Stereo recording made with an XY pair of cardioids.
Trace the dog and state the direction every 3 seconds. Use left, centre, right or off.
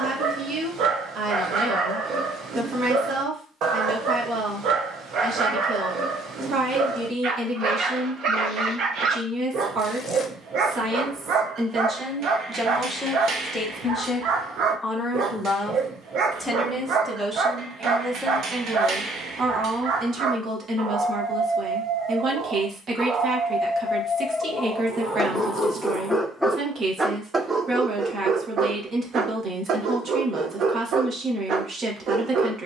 right, right, right, right, right, right, right, right, centre, right, right.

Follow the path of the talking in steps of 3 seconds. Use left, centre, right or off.
right, right, right, right, centre, centre, right, right, right, right, right.